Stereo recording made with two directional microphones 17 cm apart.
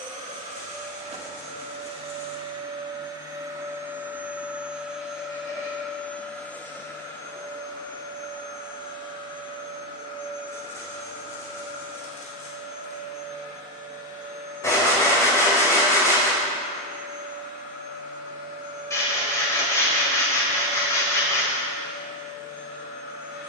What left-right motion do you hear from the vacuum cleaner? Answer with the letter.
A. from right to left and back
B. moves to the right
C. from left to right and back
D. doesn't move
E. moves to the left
E.